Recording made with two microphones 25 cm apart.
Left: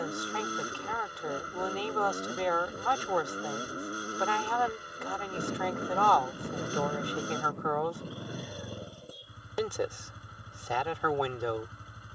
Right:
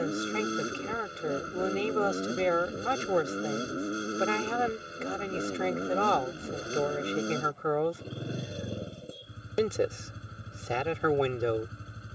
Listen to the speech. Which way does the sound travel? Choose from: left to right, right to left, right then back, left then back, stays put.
stays put.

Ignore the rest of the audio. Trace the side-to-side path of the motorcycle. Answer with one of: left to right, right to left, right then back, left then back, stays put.
stays put.